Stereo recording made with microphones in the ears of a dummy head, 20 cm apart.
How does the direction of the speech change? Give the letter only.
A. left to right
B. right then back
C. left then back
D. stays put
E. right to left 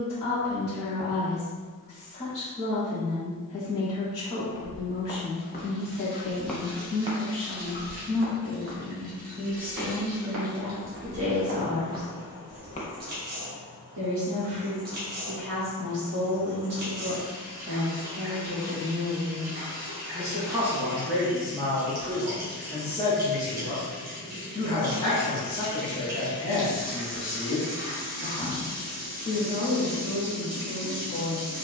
B.